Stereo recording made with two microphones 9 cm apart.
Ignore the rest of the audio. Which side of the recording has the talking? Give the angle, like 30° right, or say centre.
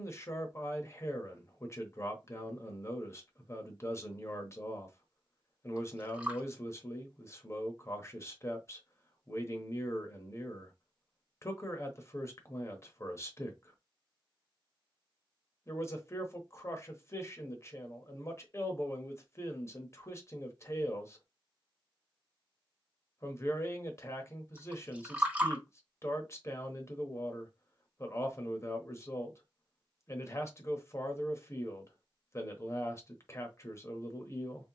30° left.